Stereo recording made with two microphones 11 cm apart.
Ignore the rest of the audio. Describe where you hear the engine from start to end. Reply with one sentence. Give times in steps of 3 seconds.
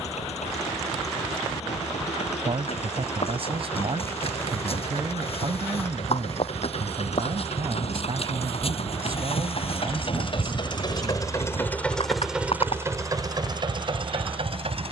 You can hear the engine on the left from 0 s and on the right from 12 s.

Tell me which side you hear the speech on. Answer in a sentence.
You can hear the speech on the right.